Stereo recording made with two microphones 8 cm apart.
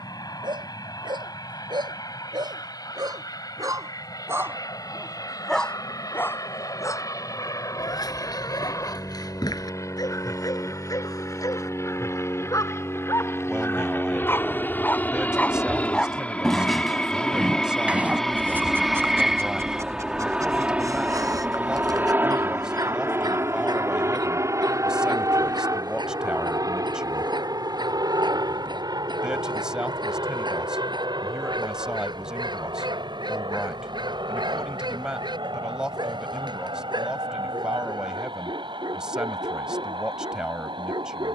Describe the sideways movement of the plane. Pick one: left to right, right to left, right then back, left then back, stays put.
left to right.